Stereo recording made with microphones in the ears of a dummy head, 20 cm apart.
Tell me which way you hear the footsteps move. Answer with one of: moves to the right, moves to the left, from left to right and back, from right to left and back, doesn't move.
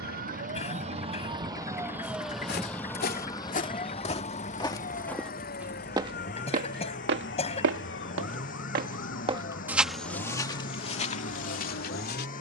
from left to right and back.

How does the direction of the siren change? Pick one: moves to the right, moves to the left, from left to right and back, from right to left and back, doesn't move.
moves to the left.